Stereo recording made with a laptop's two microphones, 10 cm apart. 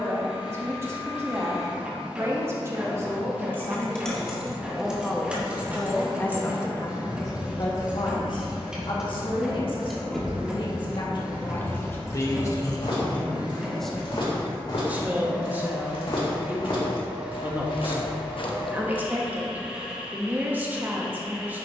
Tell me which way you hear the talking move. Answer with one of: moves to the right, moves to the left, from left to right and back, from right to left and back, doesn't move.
from right to left and back.